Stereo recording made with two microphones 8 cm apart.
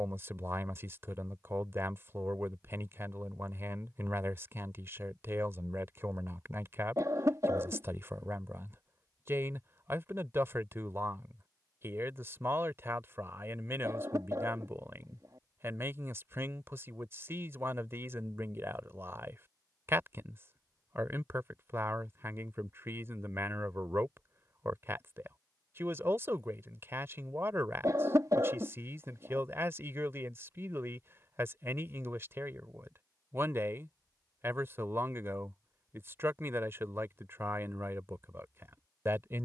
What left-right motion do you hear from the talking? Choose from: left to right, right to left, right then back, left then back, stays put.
stays put.